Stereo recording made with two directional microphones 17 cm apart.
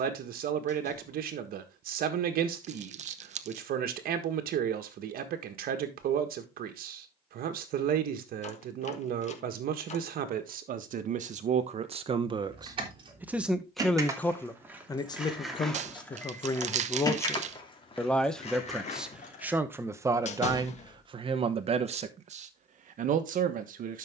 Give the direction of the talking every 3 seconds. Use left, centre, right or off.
right, right, right, right, centre, left, centre, right.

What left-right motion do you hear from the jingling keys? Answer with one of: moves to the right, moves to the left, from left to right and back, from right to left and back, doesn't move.
moves to the left.